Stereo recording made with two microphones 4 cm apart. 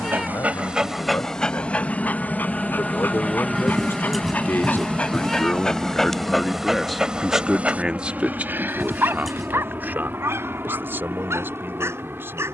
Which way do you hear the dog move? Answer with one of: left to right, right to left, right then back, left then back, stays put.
left then back.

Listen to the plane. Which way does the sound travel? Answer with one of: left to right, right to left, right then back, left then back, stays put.
left to right.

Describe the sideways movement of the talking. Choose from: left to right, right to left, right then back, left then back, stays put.
left to right.